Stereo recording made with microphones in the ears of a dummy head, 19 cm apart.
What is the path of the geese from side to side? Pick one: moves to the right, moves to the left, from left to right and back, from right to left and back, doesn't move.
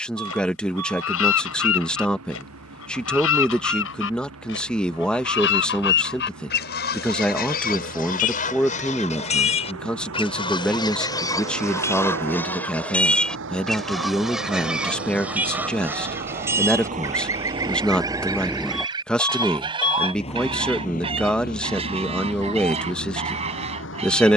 moves to the right.